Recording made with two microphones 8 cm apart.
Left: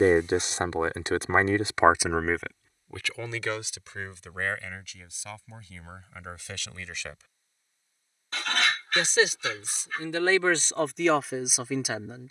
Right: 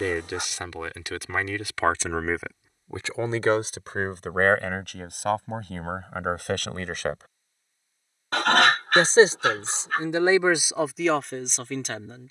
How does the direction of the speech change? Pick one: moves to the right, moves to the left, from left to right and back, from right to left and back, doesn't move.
from left to right and back.